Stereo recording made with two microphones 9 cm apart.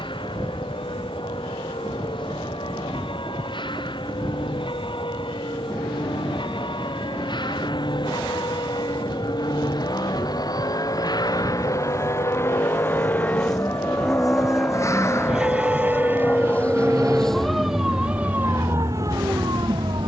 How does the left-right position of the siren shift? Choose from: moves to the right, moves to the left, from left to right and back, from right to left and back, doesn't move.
moves to the right.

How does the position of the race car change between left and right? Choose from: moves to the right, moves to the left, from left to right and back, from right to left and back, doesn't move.
moves to the right.